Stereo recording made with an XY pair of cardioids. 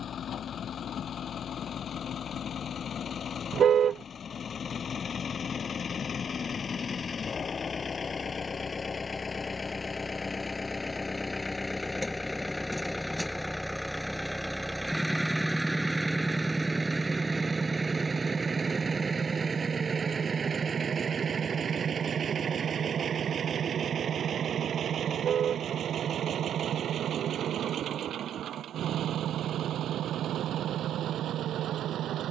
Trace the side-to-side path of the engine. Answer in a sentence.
In this clip you hear the engine go from the left side to the right.